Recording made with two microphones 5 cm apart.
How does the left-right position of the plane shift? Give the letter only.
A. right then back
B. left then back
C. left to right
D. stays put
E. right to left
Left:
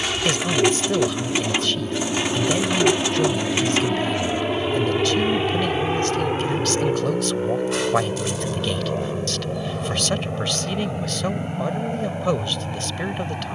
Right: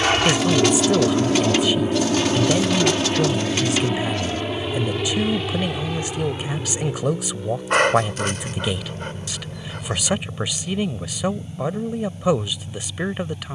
E.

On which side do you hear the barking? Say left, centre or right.
right.